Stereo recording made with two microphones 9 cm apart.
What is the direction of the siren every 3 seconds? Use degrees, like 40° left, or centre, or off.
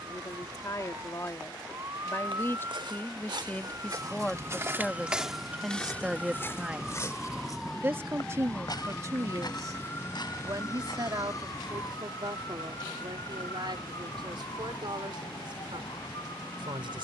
40° right, 20° right, centre, 30° left, 50° left, 70° left.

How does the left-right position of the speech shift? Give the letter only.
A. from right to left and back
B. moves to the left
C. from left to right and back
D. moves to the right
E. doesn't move
D.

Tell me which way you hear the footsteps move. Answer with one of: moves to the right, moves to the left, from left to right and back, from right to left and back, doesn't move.
moves to the left.